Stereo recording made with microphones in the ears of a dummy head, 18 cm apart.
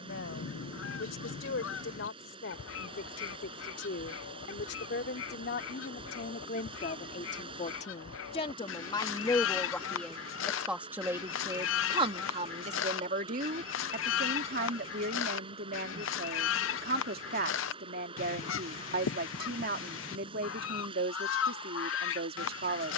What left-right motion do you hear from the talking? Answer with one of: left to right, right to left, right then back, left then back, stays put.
left to right.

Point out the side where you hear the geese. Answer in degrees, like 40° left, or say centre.
70° left.